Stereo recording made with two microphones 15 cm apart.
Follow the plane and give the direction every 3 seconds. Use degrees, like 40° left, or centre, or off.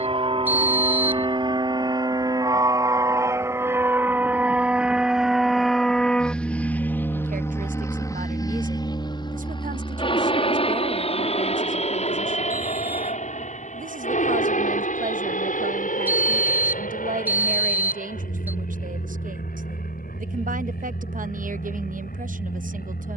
30° right, 10° right, 20° left, 40° left, 50° left, 60° left, 70° left, 70° left.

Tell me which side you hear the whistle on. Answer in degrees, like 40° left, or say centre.
10° right.